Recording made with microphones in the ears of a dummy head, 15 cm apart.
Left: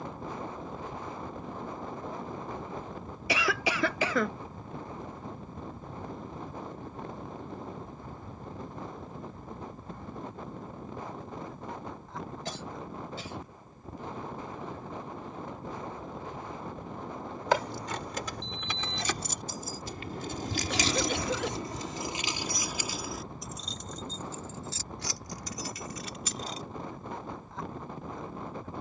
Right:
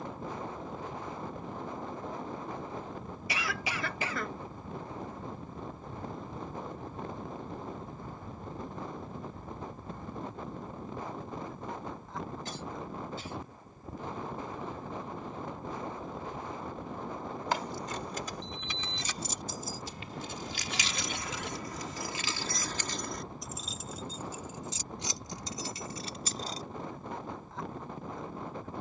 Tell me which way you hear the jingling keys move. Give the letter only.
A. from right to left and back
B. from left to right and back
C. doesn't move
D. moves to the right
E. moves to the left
D.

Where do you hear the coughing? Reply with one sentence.
You can hear the coughing on the left.